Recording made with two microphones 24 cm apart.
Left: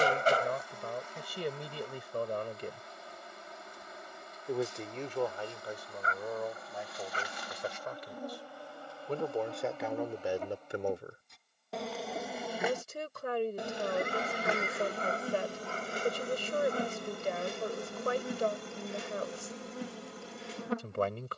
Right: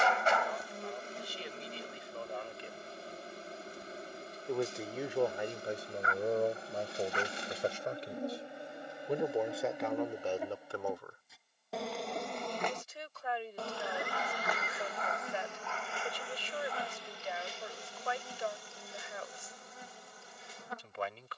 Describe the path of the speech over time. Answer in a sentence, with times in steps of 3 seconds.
You can hear the speech on the left from 0 s, in the centre from 3 s, on the right from 6 s, in the centre from 9 s and on the left from 12 s.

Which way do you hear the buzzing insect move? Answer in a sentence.
In this clip you hear the buzzing insect go from the right side to the left.